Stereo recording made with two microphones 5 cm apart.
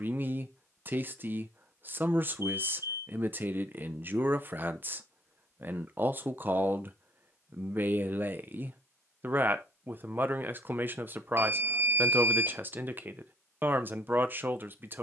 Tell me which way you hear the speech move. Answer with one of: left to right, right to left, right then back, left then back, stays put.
stays put.